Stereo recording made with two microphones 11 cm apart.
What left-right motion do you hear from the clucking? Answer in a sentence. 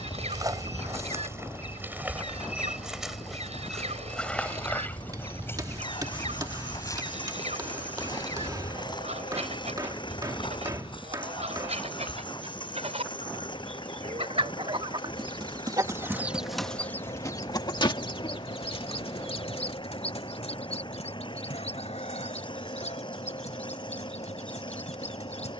In this clip you hear the clucking travel towards the left.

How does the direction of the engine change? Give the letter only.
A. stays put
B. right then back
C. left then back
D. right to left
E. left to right
A.